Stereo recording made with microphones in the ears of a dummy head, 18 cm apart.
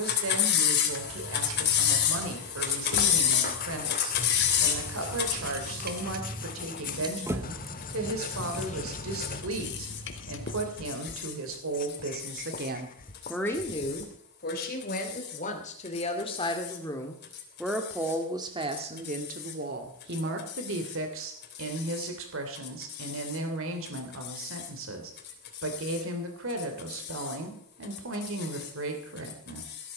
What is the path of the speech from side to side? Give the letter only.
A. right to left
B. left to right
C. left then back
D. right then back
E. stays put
C.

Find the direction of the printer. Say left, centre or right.
left.